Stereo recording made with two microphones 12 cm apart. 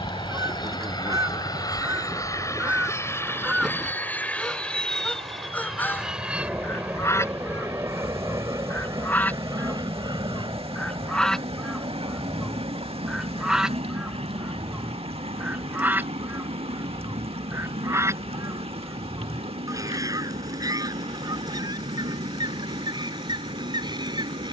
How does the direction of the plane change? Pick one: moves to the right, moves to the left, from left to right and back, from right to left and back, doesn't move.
moves to the right.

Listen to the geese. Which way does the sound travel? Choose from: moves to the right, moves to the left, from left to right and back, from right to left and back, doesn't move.
from right to left and back.